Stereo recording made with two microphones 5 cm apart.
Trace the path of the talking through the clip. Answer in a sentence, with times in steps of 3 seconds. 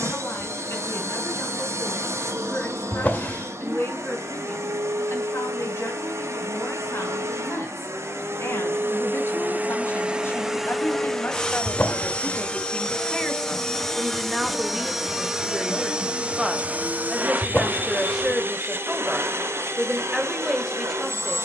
You can hear the talking on the left from 0 s and in the centre from 12 s.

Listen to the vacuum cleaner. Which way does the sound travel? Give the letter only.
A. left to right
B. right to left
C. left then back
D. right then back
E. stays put
C.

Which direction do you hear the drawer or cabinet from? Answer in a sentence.
You can hear the drawer or cabinet on the left.